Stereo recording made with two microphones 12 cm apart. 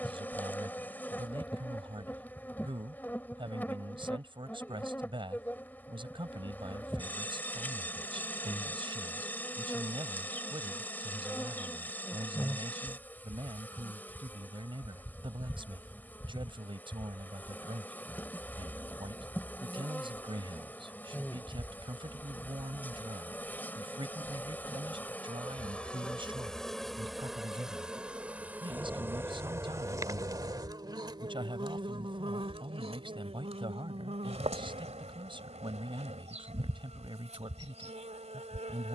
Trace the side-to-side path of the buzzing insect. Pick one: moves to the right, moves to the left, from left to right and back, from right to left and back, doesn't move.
moves to the right.